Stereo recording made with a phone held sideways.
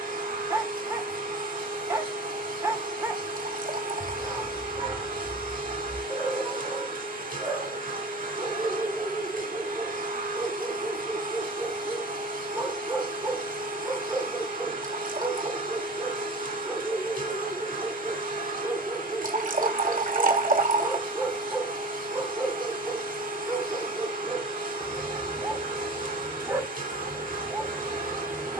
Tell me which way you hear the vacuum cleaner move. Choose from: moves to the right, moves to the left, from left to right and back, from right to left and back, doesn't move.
doesn't move.